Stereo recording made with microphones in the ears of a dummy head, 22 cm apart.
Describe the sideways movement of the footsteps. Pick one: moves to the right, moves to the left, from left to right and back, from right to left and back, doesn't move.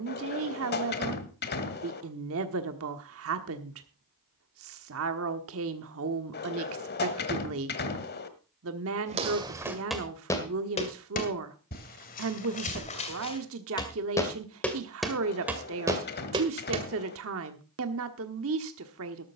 from right to left and back.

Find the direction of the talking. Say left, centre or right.
right.